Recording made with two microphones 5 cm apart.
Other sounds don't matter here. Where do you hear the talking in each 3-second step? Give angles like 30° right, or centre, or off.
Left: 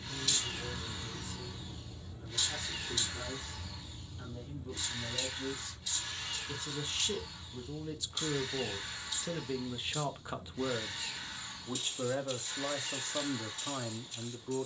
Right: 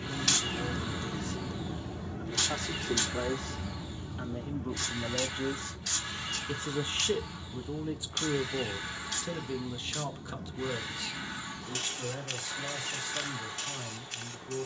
70° right, 60° right, 30° right, 20° left, 40° left.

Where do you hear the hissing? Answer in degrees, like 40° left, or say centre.
70° right.